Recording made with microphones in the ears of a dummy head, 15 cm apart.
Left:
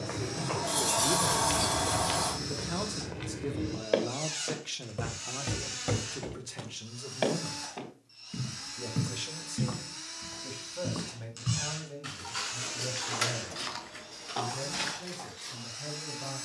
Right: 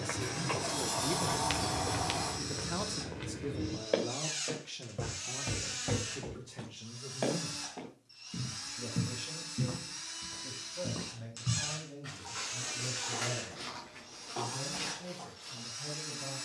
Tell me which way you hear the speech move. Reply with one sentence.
In this clip you hear the speech move to the left.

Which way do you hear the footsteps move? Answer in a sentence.
In this clip you hear the footsteps move to the left.